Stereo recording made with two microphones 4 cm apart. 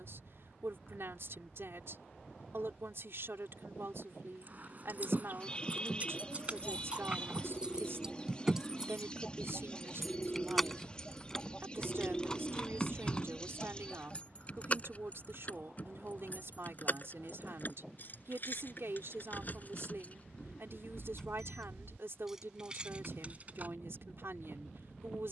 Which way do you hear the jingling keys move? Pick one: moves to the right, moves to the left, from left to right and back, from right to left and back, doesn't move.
from right to left and back.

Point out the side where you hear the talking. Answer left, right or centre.
right.